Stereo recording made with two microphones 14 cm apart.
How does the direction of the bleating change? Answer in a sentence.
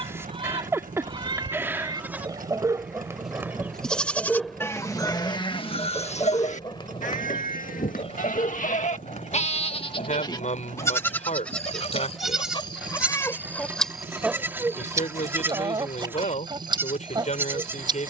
You can hear the bleating move from right to left and back again.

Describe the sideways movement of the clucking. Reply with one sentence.
You can hear the clucking go left and come back.